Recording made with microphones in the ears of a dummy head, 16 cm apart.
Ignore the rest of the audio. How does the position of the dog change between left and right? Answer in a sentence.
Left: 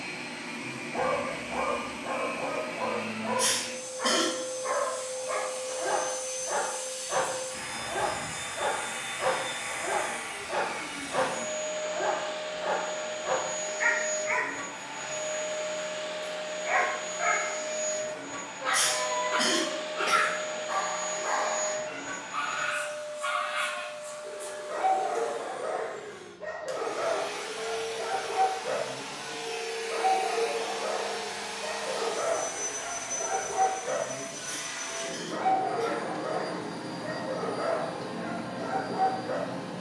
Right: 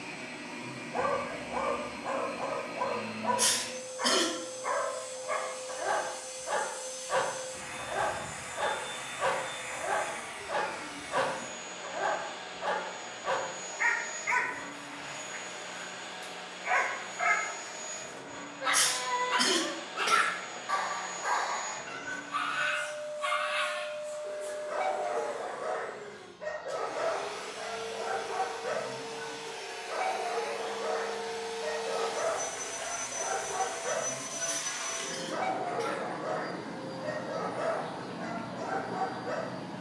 In this clip you hear the dog stay put.